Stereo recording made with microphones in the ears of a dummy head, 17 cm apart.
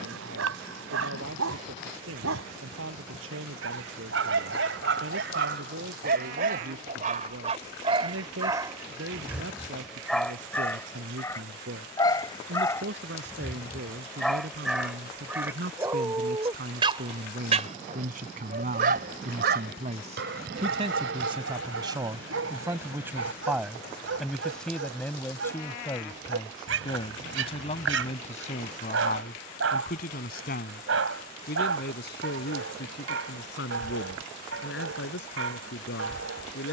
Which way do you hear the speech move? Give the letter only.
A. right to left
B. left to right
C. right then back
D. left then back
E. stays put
A.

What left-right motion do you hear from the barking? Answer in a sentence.
In this clip you hear the barking go left and come back.